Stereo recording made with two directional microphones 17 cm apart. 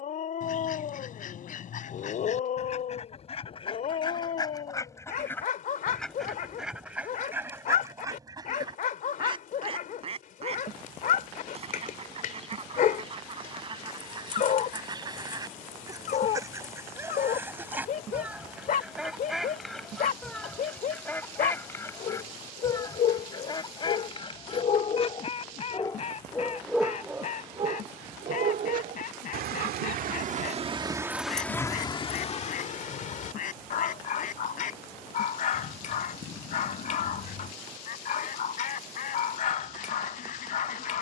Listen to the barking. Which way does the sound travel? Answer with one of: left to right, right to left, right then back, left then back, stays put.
right then back.